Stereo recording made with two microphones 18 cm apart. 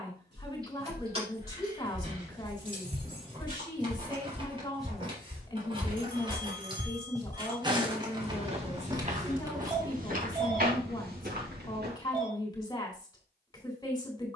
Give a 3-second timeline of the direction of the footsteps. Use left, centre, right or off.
right, centre, right, right, off.